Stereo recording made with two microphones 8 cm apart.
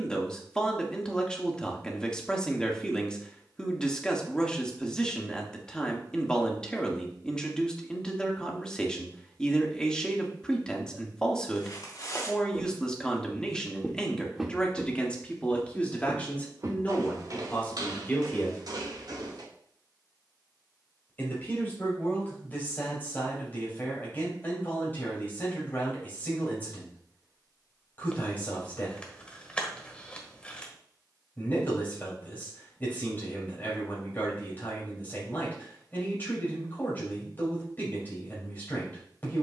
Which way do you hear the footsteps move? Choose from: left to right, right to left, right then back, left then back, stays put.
left to right.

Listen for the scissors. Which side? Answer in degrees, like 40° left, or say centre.
20° left.